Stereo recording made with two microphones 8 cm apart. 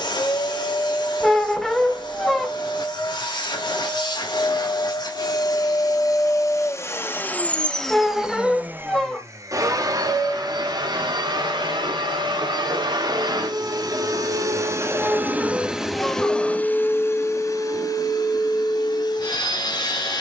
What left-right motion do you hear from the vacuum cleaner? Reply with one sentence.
You can hear the vacuum cleaner move from left to right and back again.